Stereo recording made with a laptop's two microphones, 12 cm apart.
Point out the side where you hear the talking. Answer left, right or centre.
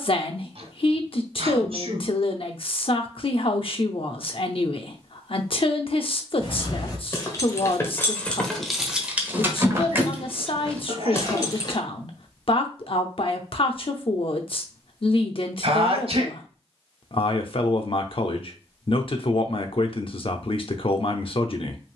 left.